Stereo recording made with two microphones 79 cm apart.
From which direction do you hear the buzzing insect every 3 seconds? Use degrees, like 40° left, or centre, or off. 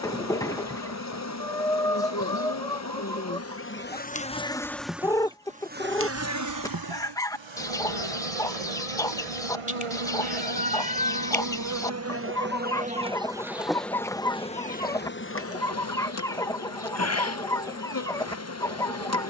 20° left, 10° left, 40° right, 40° right, centre, 20° left, 20° left.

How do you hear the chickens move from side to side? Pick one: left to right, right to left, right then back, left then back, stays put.
stays put.